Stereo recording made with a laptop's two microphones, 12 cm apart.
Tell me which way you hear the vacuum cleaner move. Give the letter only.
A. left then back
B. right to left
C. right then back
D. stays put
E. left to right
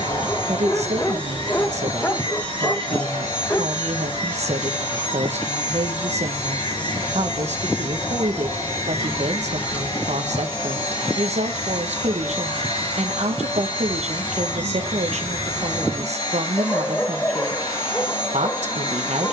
D.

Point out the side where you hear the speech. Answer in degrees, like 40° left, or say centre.
70° right.